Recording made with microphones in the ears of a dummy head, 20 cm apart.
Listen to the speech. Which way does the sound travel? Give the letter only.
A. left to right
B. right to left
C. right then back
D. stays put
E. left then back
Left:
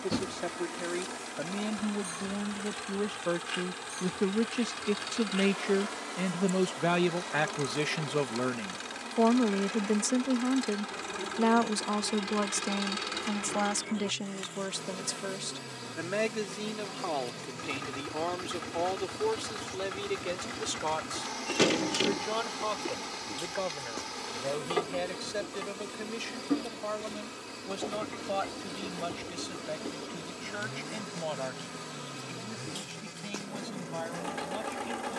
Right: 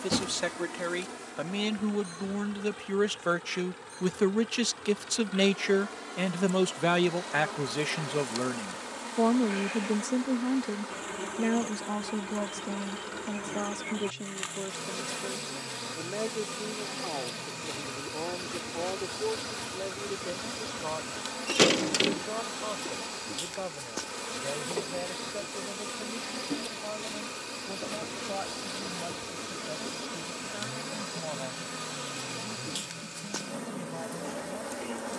B.